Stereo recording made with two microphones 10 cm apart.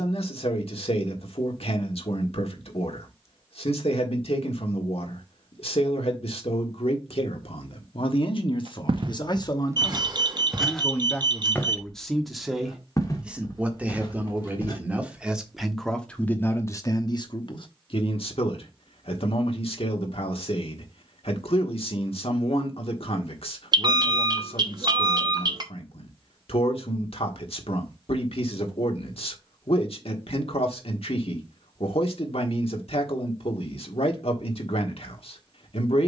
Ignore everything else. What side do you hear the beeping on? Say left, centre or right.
right.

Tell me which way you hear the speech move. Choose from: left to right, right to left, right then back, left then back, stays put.
right then back.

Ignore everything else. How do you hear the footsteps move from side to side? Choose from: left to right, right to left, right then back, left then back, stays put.
right to left.